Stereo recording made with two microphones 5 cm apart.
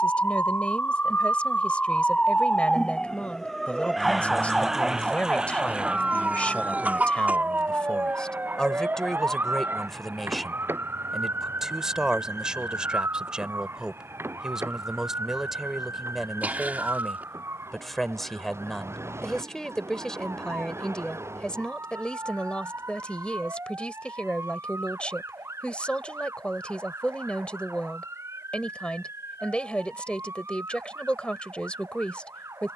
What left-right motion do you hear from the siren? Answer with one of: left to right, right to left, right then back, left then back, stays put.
left to right.